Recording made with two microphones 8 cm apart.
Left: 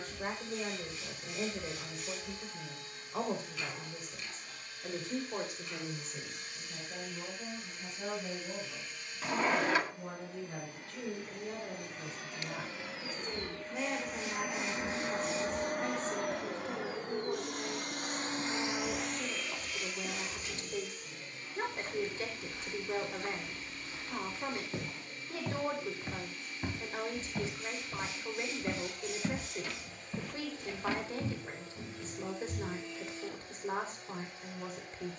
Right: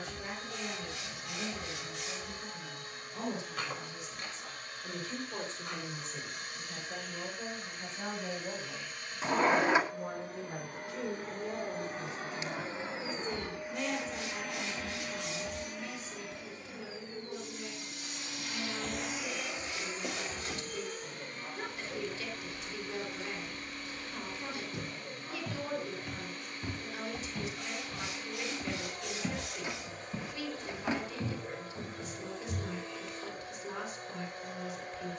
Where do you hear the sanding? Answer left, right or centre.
right.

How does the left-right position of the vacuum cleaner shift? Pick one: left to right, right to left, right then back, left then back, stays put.
left then back.